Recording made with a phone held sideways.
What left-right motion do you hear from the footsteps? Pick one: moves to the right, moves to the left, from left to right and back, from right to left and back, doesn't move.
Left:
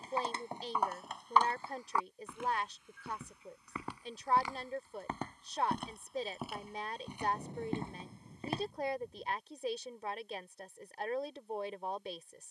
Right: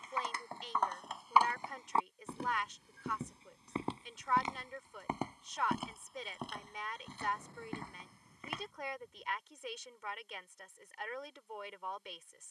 from left to right and back.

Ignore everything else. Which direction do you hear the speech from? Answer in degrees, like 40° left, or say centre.
40° left.